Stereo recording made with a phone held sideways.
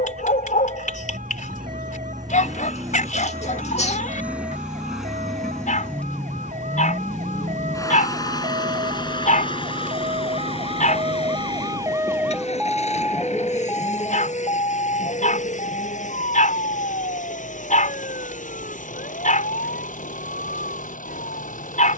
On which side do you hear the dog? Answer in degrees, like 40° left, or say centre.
60° left.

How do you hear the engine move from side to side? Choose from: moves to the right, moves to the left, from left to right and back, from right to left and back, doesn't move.
moves to the left.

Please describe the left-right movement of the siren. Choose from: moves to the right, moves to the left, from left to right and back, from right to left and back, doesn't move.
moves to the left.